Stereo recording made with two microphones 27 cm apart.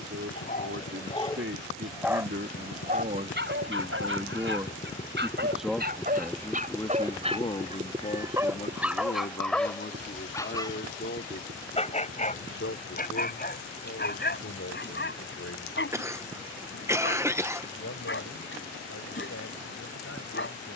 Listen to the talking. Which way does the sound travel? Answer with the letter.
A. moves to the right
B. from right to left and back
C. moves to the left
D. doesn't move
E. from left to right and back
C.